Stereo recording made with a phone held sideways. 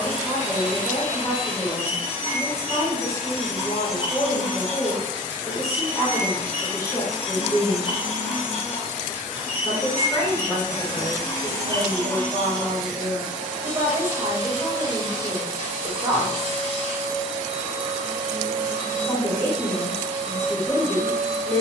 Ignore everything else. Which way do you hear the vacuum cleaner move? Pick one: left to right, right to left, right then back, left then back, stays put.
left to right.